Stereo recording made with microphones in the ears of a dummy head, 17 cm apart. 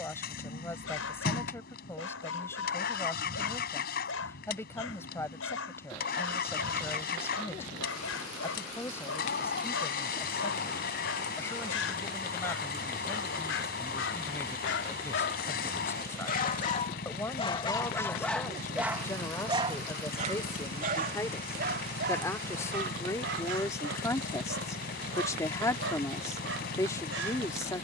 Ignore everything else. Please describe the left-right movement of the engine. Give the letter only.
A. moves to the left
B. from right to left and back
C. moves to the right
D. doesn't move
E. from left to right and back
D.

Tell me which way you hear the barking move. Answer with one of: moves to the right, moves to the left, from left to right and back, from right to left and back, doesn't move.
moves to the right.